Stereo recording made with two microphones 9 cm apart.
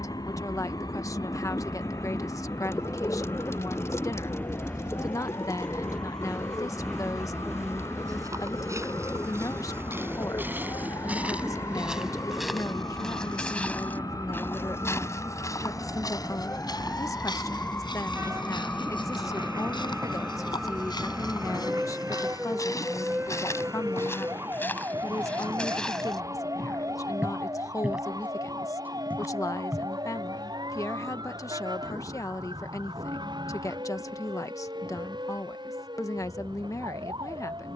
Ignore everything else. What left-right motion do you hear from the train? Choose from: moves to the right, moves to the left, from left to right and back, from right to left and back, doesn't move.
moves to the right.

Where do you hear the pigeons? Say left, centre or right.
left.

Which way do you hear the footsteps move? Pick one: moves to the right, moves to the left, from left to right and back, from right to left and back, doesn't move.
from right to left and back.